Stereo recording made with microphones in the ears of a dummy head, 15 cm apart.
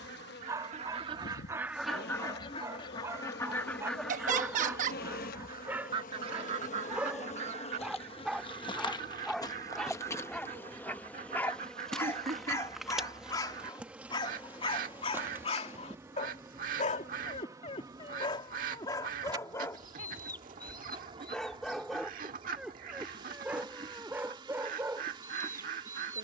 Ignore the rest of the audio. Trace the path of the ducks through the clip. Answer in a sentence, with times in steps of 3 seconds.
In this clip you hear the ducks in the centre from 0 s and on the right from 6 s.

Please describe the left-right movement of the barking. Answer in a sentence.
In this clip you hear the barking go left and come back.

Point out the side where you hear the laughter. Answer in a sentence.
You can hear the laughter on the right.